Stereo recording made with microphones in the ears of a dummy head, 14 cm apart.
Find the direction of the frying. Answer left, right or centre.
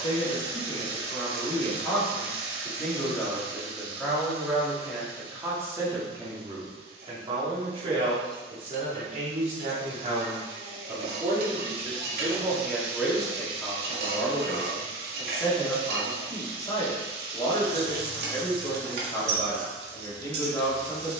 right.